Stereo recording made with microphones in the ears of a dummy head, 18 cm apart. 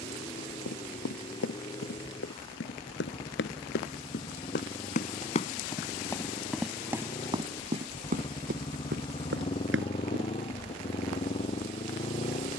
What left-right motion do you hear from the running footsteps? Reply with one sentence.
In this clip you hear the running footsteps go from the left side to the right.